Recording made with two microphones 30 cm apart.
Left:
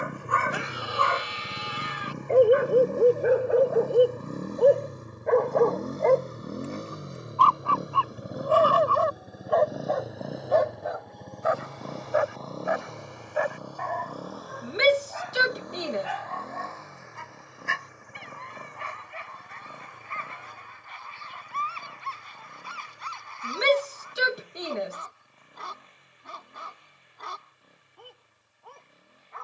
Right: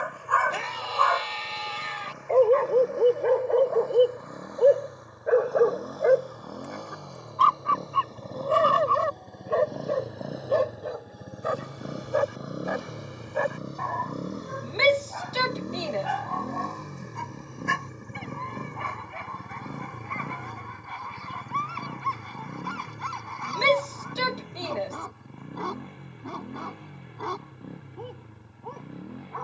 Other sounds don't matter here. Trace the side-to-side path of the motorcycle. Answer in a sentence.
In this clip you hear the motorcycle travel towards the right.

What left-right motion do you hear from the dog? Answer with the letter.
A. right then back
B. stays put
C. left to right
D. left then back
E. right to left
C.